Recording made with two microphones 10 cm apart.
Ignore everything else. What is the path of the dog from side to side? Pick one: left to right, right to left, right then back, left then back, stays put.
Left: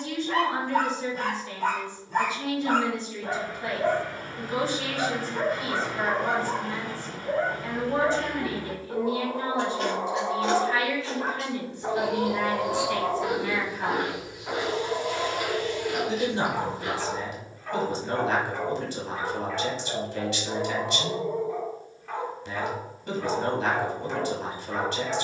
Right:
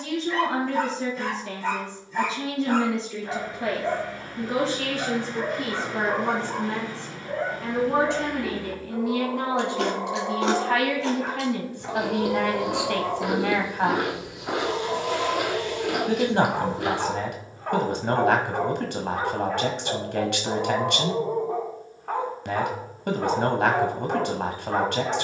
left to right.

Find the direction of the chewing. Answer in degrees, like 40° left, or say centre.
80° right.